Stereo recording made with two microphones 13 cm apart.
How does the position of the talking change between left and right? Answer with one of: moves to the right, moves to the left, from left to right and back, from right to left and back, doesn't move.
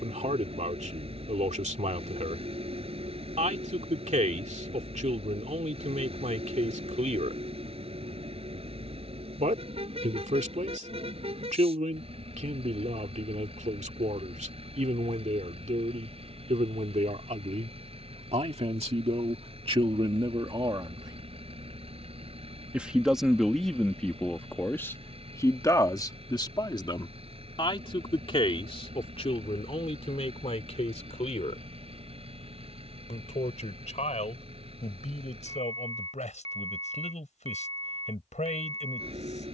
moves to the left.